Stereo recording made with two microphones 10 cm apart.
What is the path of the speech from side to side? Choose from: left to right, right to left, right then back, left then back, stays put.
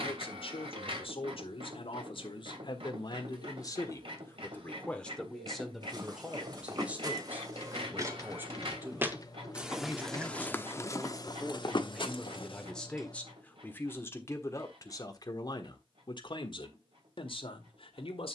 right then back.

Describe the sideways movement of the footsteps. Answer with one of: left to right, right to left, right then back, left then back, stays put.
right to left.